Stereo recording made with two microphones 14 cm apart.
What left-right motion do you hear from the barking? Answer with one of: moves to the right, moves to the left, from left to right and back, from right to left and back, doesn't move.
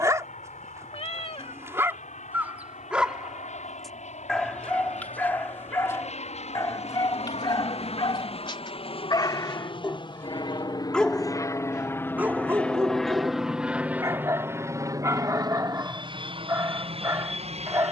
from right to left and back.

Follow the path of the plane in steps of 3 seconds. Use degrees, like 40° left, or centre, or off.
70° left, 60° left, 50° left, 30° left, centre, 40° right.